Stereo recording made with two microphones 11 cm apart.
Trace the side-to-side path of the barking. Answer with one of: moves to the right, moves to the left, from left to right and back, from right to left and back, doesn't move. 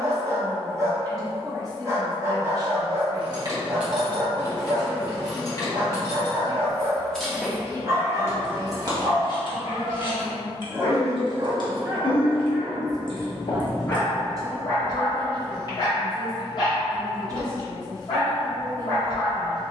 moves to the left.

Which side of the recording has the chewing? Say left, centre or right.
left.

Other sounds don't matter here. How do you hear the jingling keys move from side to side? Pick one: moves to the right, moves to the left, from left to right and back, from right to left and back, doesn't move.
from right to left and back.